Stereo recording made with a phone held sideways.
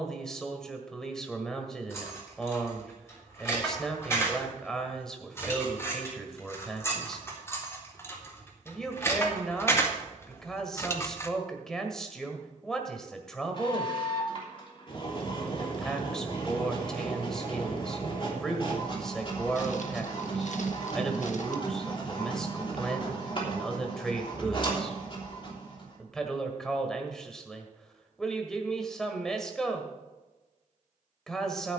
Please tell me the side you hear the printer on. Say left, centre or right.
left.